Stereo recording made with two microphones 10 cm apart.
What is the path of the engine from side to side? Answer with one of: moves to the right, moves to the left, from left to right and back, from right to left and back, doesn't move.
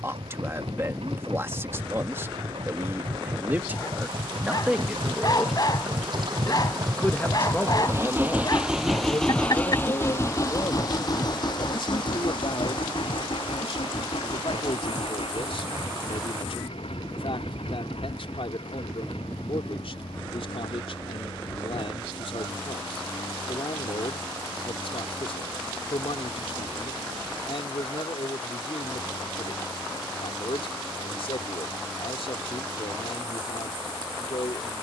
moves to the left.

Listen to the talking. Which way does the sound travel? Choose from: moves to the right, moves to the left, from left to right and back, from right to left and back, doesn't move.
moves to the left.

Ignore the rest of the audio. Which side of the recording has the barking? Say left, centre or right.
left.